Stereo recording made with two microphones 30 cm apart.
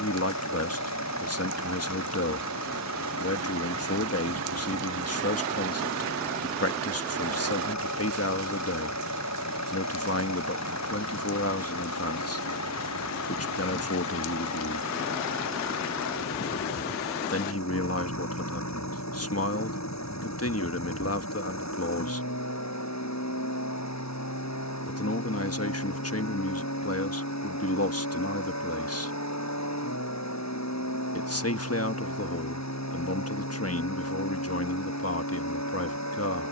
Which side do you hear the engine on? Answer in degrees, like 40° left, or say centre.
60° left.